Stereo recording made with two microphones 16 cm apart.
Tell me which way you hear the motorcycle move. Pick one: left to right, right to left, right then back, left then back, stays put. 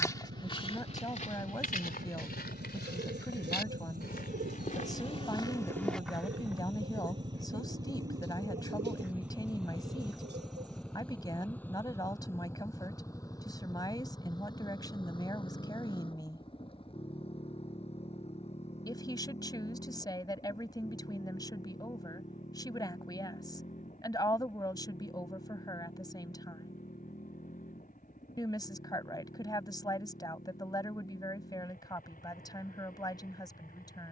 right to left.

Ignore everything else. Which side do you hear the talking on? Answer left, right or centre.
left.